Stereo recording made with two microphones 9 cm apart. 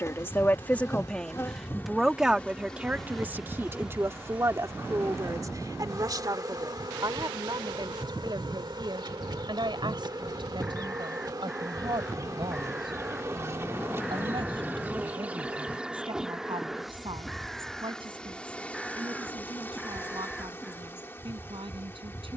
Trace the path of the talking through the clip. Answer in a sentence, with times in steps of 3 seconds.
In this clip you hear the talking in the centre from 0 s and on the right from 3 s.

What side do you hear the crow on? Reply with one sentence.
In this clip you hear the crow in the centre.